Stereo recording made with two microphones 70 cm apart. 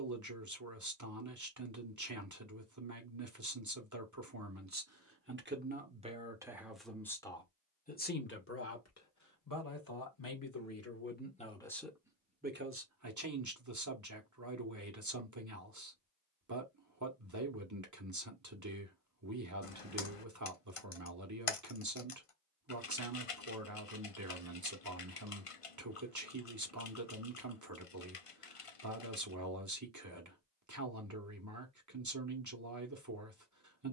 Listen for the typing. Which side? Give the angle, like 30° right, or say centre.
50° left.